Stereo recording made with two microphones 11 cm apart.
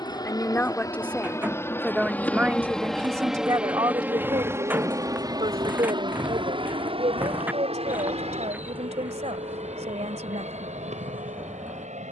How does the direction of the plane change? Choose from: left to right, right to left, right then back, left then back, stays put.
left to right.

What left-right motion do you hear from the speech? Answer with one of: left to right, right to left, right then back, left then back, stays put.
left to right.